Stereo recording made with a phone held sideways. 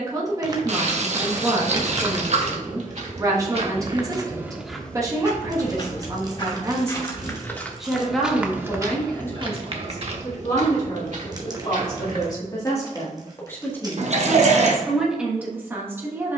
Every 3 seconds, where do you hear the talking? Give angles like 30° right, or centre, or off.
20° right, 20° right, 10° right, 30° left, 20° left, 10° right.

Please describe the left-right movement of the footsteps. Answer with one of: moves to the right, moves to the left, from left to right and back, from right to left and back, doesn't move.
from right to left and back.